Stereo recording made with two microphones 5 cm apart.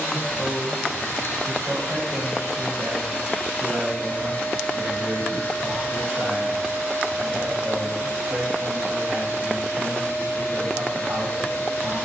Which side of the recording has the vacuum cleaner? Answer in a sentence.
You can hear the vacuum cleaner on the left.